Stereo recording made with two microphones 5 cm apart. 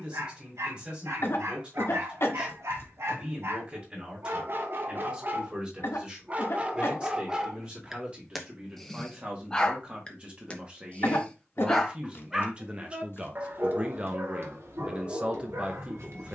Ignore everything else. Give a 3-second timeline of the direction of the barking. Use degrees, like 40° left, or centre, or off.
60° right, 50° right, 20° right, 10° left, 40° right, 60° right.